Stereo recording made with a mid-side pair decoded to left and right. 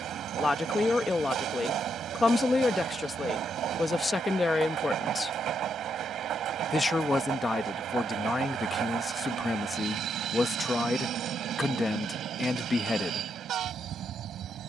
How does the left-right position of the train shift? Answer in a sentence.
You can hear the train stay in one place.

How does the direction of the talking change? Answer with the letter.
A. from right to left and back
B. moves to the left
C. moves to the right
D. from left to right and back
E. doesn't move
E.